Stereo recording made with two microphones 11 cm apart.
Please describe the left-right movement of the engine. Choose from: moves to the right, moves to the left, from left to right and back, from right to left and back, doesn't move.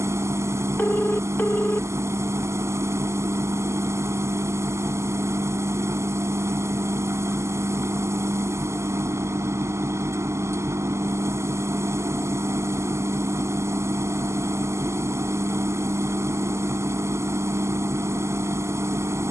doesn't move.